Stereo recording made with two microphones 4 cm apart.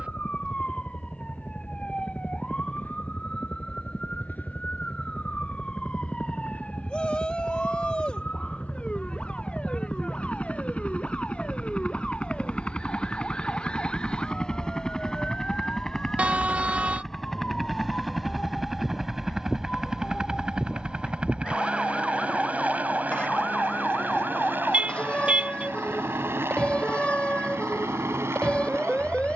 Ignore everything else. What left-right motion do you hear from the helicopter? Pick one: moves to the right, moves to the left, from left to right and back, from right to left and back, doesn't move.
moves to the right.